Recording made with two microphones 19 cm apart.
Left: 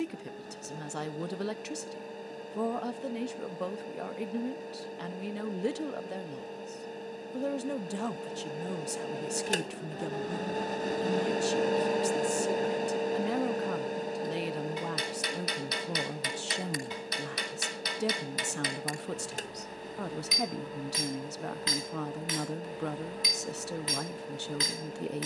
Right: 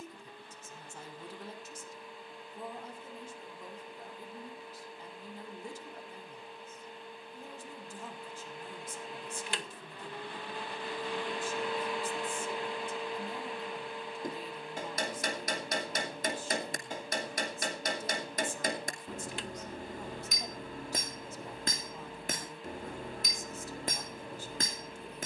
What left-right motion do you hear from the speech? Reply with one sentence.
In this clip you hear the speech stay in one place.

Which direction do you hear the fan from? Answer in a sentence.
In this clip you hear the fan on the left.